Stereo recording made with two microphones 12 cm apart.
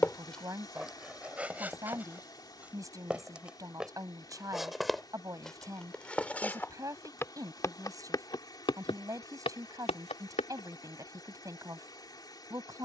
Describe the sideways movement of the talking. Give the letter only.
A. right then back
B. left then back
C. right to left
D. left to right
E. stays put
E.